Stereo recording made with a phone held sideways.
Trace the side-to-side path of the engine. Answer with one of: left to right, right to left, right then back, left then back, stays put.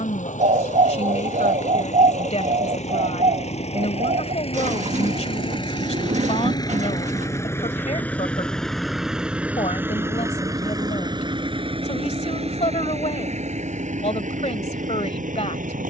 left to right.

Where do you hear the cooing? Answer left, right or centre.
right.